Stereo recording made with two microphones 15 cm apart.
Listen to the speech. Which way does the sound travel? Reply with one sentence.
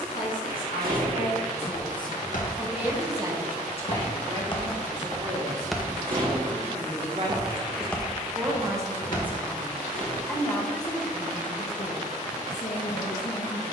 You can hear the speech go right and come back.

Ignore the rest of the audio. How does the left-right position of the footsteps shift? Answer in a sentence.
In this clip you hear the footsteps go right and come back.